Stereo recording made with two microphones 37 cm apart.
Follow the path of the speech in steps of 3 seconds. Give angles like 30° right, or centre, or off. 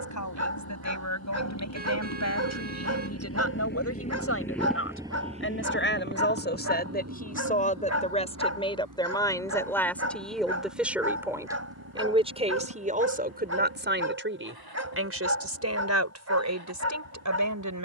40° left, 40° left, 20° left, centre, 20° right, 40° right.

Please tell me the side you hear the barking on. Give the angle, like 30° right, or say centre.
40° right.